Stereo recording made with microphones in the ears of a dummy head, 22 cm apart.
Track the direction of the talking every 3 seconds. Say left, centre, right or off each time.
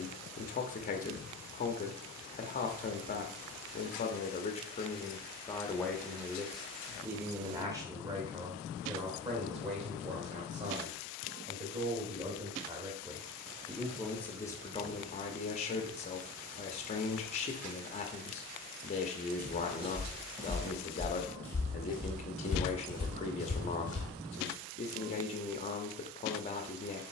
left, left, centre, right, centre, left, left, left, left.